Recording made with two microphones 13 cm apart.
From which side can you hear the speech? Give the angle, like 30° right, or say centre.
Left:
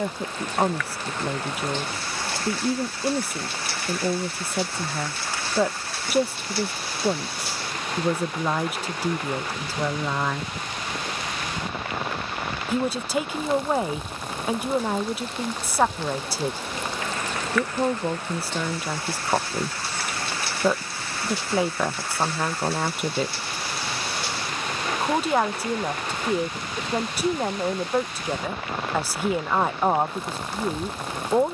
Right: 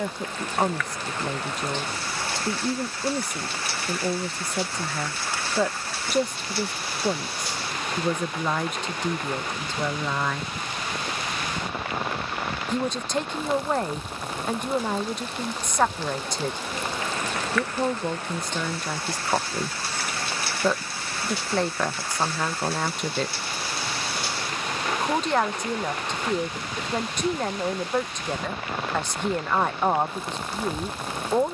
10° left.